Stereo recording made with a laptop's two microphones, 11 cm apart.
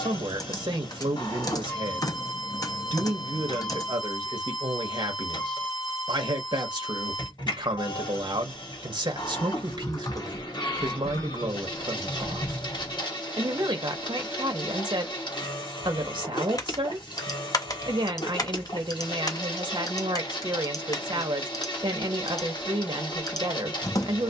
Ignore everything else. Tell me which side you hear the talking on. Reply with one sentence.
You can hear the talking on the right.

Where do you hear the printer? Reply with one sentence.
You can hear the printer on the left.